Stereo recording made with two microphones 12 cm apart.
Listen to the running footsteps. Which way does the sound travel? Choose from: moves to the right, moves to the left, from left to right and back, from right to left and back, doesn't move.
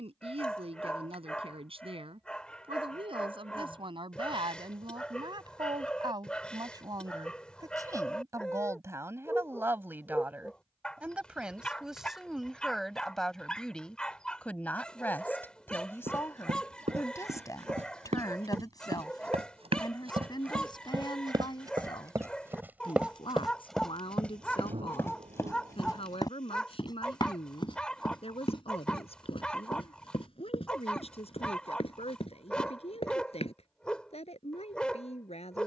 moves to the left.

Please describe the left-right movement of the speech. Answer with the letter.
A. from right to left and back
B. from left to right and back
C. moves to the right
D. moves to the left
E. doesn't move
D.